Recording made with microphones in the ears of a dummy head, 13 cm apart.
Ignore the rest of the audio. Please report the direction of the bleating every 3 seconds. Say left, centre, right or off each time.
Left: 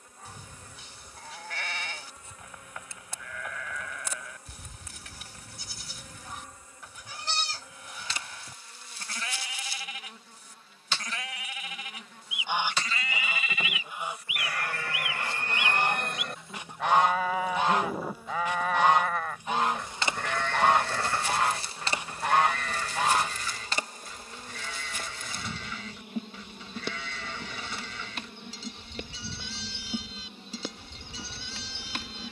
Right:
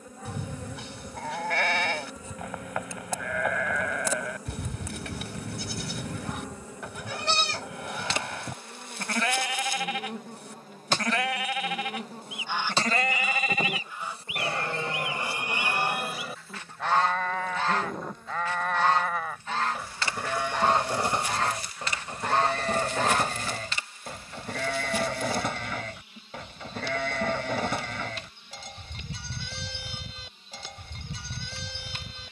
right, right, right, right, right, centre, centre, right, right, right, right.